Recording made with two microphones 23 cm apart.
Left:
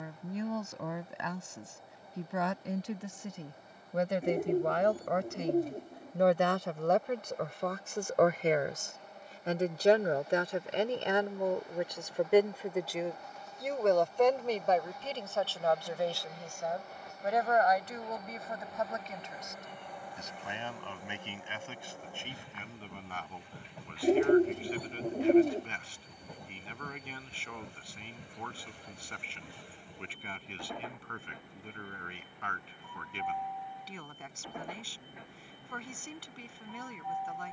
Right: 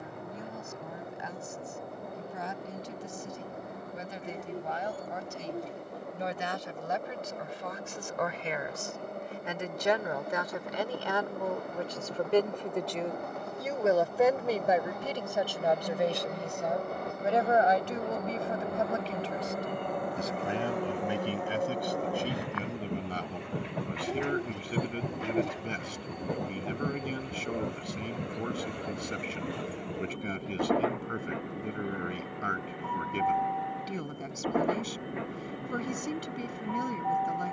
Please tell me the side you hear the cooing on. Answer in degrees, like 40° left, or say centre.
50° left.